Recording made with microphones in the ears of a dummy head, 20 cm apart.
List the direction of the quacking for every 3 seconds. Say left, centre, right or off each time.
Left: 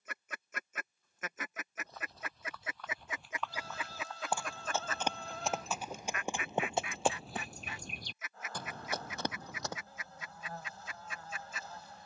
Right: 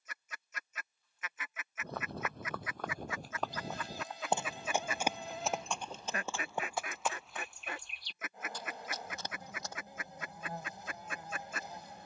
left, centre, right, right.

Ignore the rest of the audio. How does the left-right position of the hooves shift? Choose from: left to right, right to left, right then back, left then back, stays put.
right to left.